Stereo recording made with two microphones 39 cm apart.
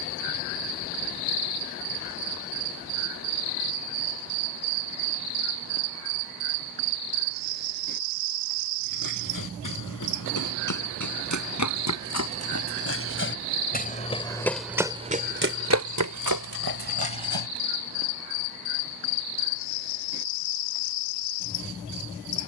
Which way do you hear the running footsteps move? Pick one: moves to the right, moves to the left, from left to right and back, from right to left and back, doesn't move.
moves to the right.